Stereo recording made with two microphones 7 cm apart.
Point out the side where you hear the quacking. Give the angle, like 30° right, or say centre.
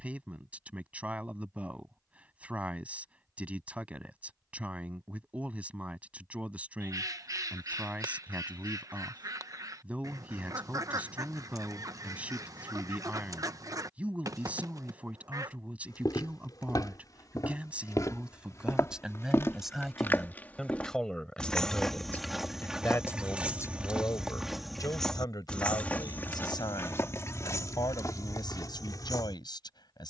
50° right.